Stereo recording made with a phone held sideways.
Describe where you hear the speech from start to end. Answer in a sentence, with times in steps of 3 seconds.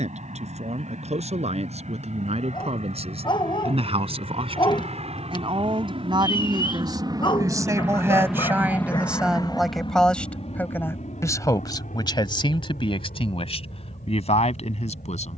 In this clip you hear the speech on the right from 0 s, in the centre from 9 s and on the left from 12 s.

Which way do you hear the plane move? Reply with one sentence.
You can hear the plane move to the left.